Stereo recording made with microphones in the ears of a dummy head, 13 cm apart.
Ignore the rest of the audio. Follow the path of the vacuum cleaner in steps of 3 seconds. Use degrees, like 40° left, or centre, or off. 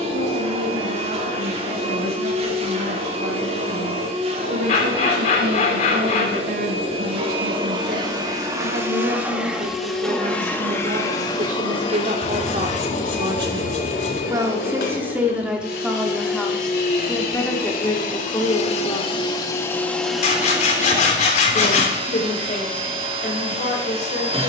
40° right, 40° right, 30° right, 10° left, 50° left, 60° left, 20° left, 30° right.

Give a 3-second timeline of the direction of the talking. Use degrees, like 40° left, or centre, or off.
80° right, 70° right, 70° right, 50° right, 30° right, centre, 20° left, 50° left.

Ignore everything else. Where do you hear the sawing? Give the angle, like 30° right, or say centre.
50° left.